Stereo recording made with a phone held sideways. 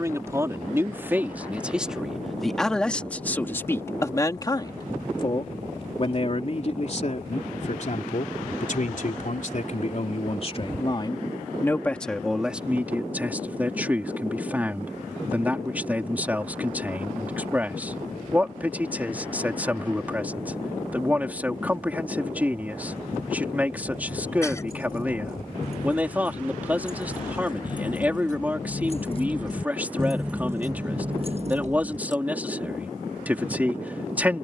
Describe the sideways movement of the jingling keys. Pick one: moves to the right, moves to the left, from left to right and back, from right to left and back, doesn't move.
moves to the right.